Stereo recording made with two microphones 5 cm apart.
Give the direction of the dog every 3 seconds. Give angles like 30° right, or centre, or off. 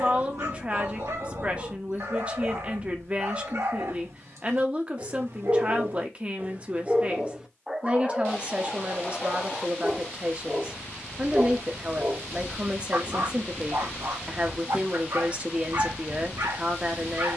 80° right, 70° right, 10° right, centre, 60° right, 80° right.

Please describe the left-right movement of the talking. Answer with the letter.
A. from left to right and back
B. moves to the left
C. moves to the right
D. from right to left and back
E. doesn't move
E.